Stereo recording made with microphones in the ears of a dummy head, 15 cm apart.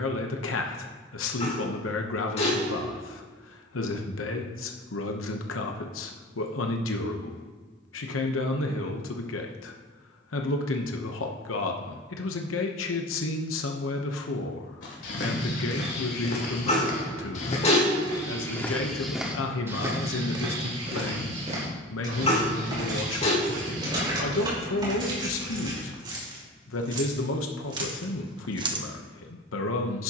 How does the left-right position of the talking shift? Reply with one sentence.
You can hear the talking stay in one place.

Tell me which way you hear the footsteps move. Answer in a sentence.
You can hear the footsteps move from left to right.